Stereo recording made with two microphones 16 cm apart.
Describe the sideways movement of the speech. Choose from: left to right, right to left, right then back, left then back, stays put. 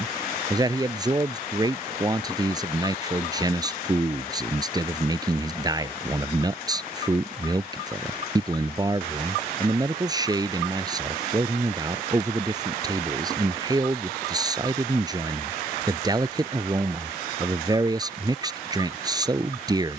stays put.